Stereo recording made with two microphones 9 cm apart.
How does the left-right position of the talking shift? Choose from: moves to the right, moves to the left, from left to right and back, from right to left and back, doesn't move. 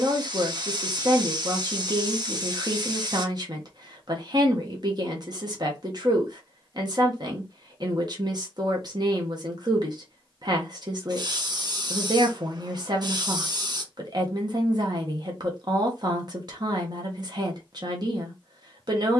doesn't move.